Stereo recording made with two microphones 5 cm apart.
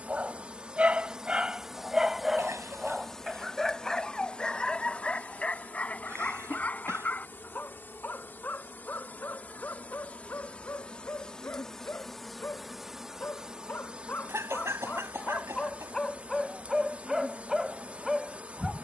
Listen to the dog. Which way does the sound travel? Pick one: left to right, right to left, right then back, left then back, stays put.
left then back.